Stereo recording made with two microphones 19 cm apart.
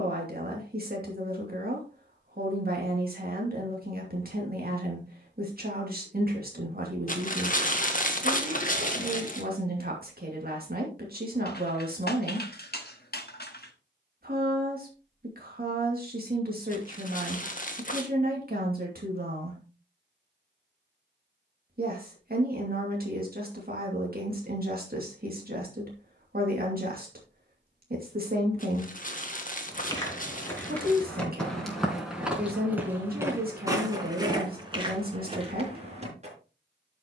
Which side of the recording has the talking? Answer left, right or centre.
right.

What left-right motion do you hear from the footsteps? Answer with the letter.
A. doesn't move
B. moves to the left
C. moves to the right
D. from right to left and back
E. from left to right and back
C.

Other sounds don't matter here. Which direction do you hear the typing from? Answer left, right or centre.
left.